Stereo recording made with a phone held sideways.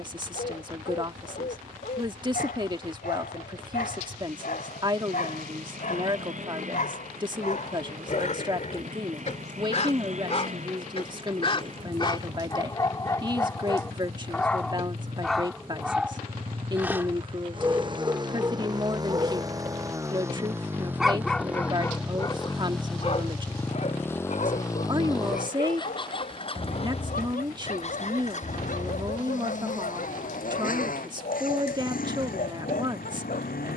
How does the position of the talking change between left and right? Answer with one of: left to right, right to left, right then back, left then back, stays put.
stays put.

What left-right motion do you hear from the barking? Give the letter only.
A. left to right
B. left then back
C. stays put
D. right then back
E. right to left
D.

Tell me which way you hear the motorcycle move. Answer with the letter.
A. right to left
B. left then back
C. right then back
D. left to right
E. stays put
A.